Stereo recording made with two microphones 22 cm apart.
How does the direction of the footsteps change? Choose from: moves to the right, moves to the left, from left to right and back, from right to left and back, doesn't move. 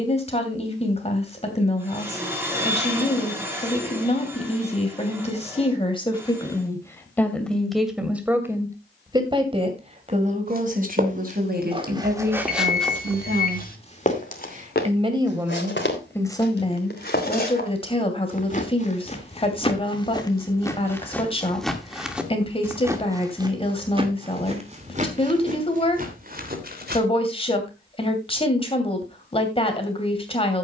from right to left and back.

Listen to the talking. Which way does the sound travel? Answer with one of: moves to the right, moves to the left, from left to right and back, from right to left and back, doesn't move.
from left to right and back.